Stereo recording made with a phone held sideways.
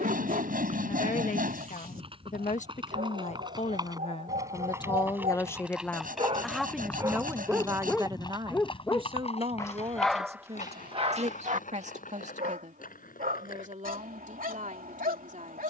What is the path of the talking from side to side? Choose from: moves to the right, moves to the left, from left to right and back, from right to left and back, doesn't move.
moves to the right.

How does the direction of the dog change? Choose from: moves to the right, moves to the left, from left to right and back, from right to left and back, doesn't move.
from right to left and back.